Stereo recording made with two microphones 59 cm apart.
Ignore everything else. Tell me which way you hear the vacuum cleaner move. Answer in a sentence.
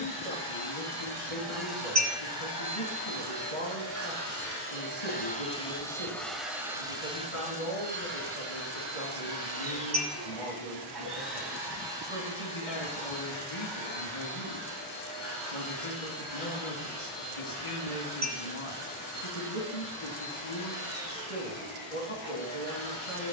You can hear the vacuum cleaner go from the left side to the right.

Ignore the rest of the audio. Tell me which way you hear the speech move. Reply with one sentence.
In this clip you hear the speech stay in one place.